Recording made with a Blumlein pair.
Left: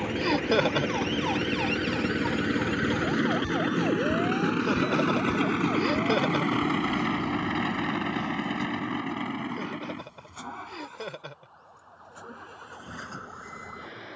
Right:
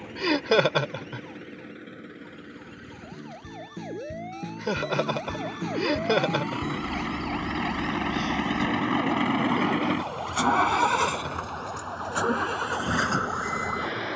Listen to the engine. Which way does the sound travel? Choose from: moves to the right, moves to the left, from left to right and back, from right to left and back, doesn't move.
moves to the right.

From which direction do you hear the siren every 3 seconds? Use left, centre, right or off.
left, centre, right, right, right.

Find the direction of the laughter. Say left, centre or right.
centre.